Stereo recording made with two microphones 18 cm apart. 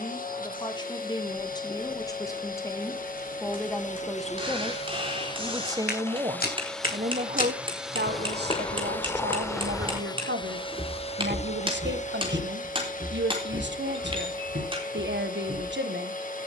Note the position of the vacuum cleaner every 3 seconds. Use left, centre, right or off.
left, left, centre, left, left, left.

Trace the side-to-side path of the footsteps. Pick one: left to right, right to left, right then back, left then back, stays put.
left to right.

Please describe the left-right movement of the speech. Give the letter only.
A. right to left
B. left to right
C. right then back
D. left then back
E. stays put
B.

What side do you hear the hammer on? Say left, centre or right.
right.